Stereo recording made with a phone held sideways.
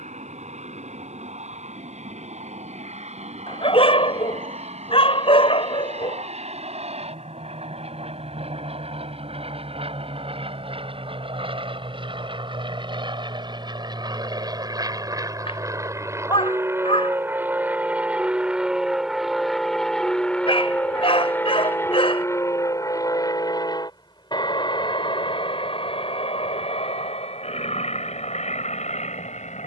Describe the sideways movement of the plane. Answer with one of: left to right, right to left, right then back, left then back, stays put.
right to left.